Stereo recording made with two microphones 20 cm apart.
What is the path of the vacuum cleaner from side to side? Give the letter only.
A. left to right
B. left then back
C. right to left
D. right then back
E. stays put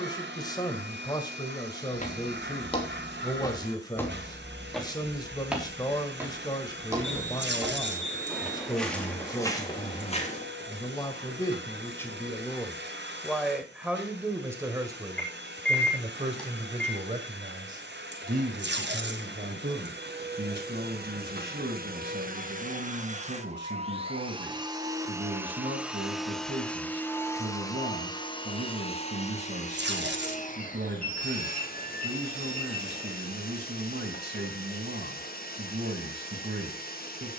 C.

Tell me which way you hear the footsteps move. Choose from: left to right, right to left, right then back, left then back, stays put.
right then back.